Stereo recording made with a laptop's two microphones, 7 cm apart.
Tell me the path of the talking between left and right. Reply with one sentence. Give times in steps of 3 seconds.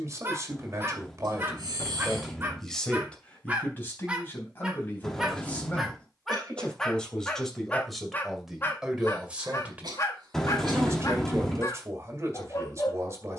You can hear the talking on the right from 0 s, on the left from 3 s, in the centre from 6 s and on the right from 9 s.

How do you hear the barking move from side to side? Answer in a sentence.
You can hear the barking move from right to left.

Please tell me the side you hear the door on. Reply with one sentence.
In this clip you hear the door in the centre.